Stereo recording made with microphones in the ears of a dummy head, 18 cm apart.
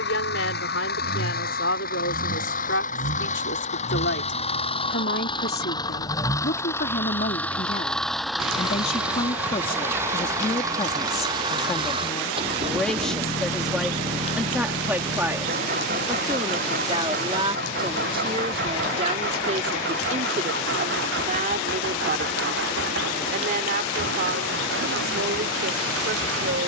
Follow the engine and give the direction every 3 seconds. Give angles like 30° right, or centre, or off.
50° left, 30° left, 10° left, 10° right, 30° right, 40° right, 50° right, 60° right, 60° right.